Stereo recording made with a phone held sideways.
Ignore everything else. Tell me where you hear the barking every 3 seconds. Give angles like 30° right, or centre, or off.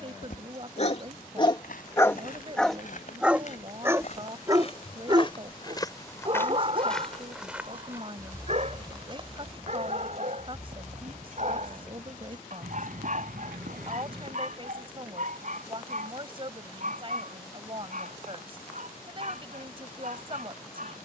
30° left, 20° right, 40° right, 50° right, 50° right, 60° right, 60° right.